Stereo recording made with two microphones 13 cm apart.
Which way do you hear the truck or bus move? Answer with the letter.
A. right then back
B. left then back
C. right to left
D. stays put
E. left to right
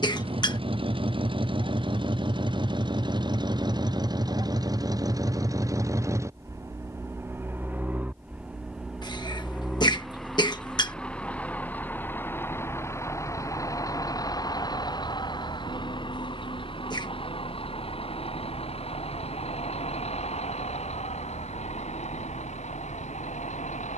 C.